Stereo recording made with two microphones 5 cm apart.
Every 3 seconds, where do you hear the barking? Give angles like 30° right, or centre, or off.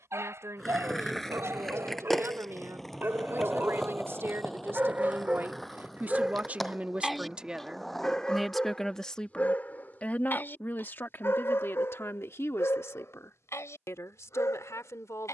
50° right, 30° right, 10° left, 40° left, 60° left.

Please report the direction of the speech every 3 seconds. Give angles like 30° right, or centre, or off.
60° right, 50° right, 10° right, 40° left, 60° left.